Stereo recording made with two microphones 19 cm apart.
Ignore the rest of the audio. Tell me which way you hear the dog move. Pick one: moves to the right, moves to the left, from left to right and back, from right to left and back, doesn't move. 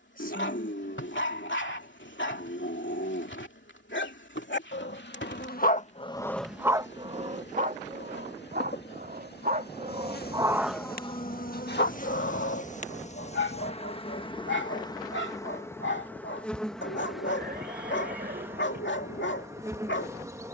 from left to right and back.